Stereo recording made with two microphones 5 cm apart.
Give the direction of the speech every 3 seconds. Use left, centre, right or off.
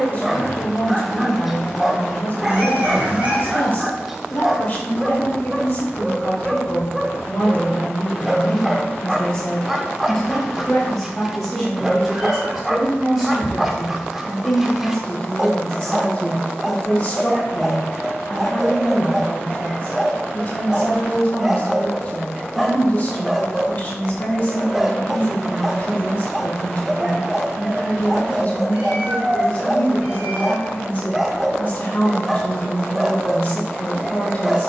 left, left, left, centre, centre, left, left, left, left, left, left, left.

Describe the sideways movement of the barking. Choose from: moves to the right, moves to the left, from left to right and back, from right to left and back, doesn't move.
doesn't move.